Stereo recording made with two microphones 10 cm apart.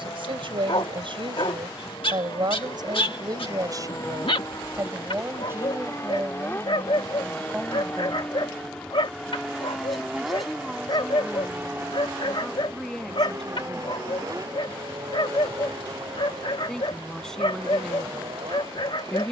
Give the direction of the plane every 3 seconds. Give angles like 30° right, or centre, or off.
50° left, 40° left, 20° left, 10° right, 30° right, 50° right, 50° right.